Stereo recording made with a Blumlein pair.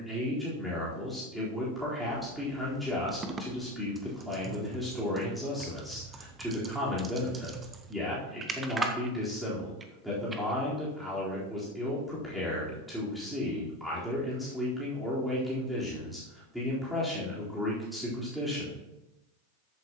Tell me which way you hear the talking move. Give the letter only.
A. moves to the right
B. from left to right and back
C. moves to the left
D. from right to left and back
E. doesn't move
E.